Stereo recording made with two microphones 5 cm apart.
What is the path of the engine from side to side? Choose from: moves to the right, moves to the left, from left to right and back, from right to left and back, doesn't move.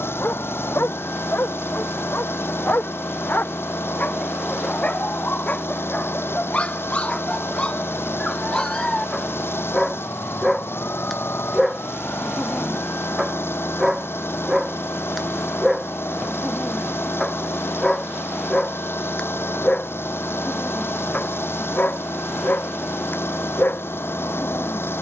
doesn't move.